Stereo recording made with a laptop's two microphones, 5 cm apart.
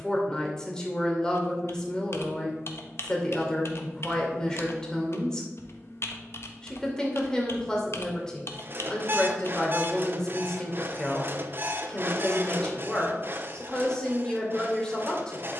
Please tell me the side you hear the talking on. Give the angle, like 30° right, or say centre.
10° left.